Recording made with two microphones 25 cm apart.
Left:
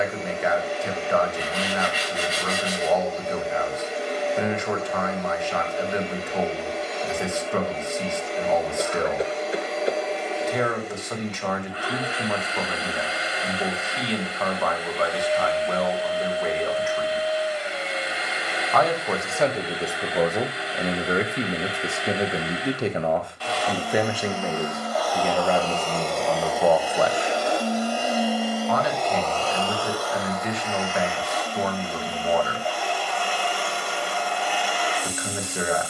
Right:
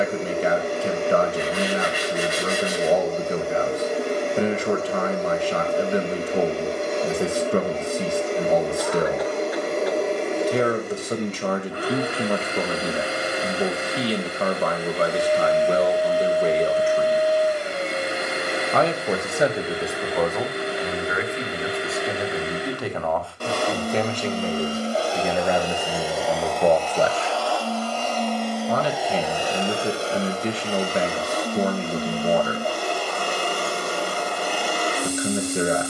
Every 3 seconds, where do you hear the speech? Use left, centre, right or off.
right, right, right, right, right, right, centre, left, centre, right, right, right.